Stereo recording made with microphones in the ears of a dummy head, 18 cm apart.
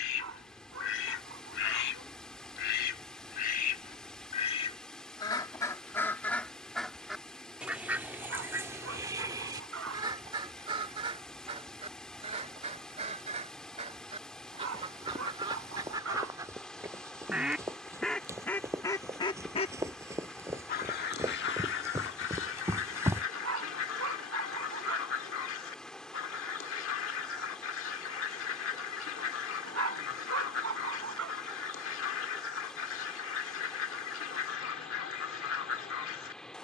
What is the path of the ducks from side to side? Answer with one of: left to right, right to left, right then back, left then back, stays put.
right then back.